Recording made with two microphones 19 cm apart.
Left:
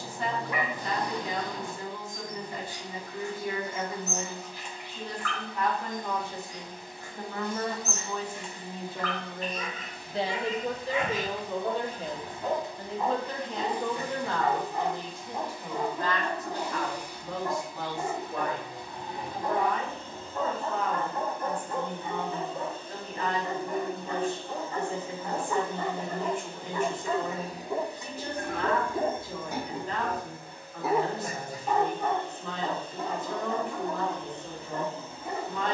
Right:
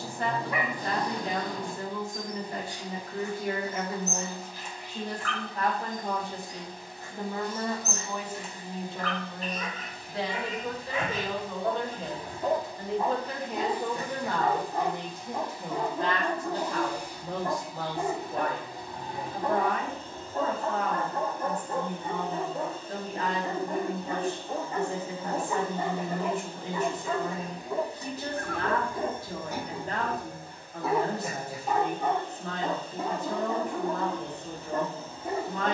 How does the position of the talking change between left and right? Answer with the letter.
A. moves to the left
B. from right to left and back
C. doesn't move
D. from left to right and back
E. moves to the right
B.